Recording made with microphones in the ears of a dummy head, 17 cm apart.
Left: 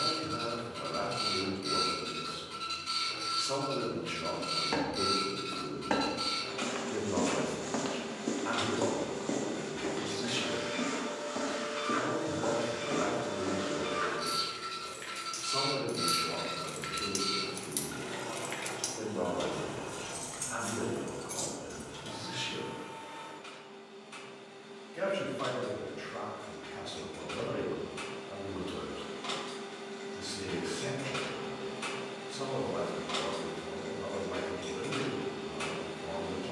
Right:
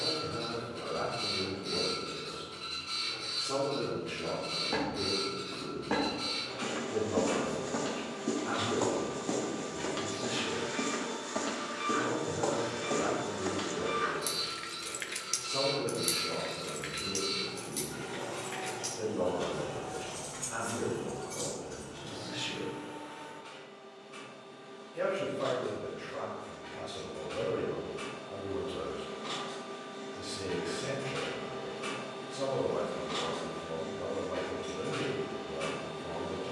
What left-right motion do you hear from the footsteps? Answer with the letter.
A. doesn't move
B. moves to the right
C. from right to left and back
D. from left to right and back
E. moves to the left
B.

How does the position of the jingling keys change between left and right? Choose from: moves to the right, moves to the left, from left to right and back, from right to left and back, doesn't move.
moves to the left.